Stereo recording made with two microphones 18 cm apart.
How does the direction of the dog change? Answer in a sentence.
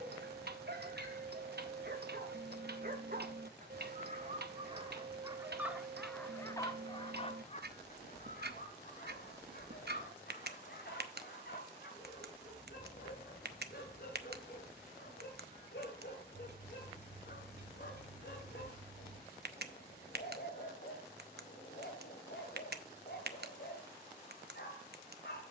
You can hear the dog go from the right side to the left.